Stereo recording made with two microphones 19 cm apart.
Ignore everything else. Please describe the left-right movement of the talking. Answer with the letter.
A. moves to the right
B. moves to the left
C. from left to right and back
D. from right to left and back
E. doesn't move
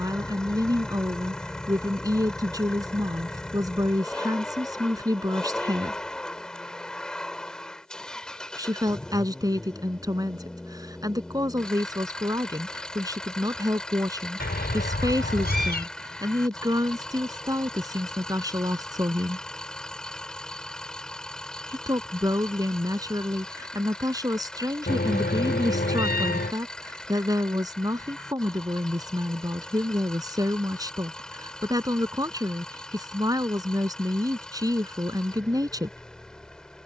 E.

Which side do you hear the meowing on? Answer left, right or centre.
left.